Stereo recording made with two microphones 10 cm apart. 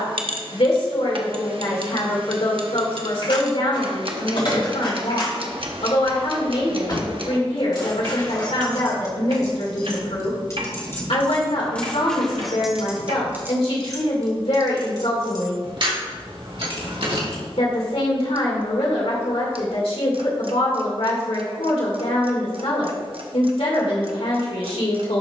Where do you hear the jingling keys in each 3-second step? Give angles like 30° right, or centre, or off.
off, 60° left, 50° left, 30° left, 20° right, 60° right, off, off, off.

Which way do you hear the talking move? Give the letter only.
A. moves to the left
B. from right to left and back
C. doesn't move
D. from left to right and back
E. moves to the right
C.